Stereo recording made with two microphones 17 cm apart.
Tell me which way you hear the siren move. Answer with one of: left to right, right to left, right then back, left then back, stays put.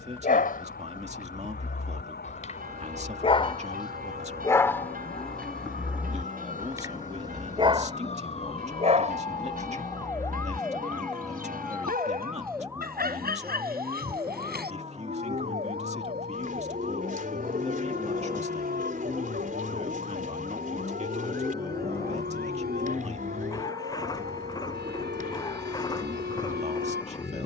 left to right.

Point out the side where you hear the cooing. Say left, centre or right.
right.